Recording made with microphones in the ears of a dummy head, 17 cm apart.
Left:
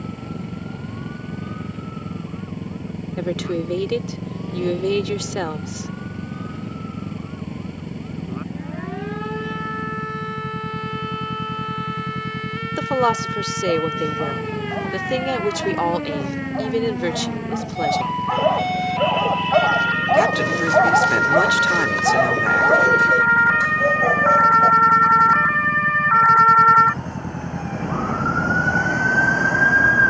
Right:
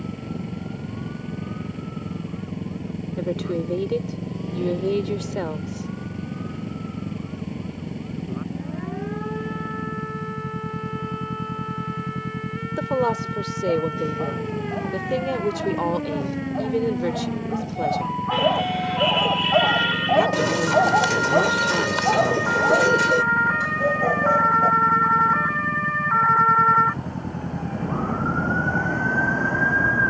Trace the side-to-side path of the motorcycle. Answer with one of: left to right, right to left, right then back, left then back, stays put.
stays put.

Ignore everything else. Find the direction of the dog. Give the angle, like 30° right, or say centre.
20° left.